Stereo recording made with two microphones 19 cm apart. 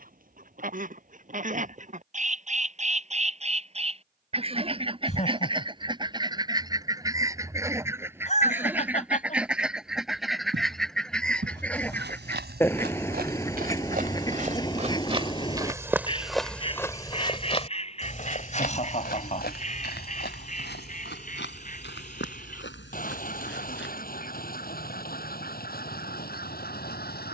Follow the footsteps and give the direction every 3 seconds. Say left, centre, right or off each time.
off, off, off, right, right, centre, left, left, off.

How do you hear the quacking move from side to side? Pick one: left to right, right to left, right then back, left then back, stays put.
right to left.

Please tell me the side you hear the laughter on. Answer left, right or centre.
left.